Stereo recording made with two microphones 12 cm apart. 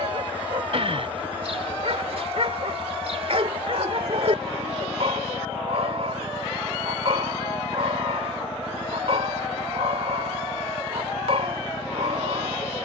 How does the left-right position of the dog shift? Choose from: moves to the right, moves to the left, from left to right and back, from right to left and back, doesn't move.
doesn't move.